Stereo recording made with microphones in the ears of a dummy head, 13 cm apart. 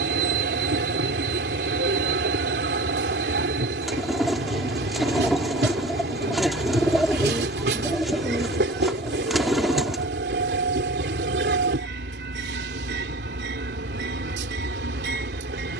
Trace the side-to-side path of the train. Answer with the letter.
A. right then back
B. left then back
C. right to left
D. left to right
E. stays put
E.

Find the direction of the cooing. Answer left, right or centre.
centre.